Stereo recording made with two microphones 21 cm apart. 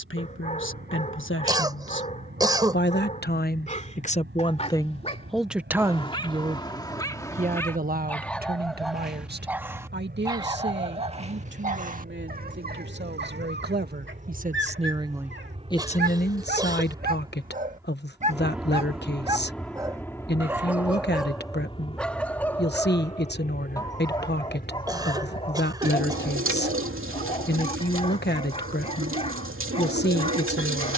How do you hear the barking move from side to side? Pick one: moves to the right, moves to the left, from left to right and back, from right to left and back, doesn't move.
from left to right and back.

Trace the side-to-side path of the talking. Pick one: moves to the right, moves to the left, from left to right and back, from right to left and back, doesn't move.
from left to right and back.